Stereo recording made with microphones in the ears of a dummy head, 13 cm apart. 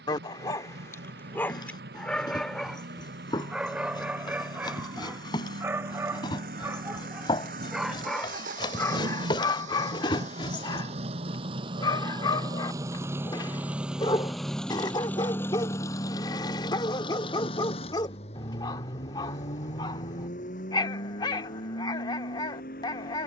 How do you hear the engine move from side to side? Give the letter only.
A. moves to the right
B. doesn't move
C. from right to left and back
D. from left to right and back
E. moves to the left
E.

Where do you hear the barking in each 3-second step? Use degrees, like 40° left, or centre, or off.
10° left, 10° right, 10° right, 30° left, 30° left, 30° left, 30° left, 30° left.